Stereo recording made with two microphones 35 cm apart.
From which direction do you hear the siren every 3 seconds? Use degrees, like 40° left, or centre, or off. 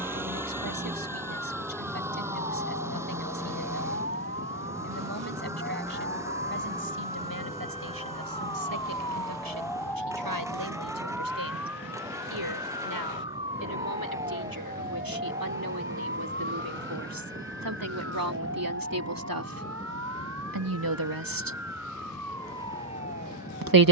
50° left, 40° left, 20° left, centre, 20° right, 30° right, 40° right, 50° right.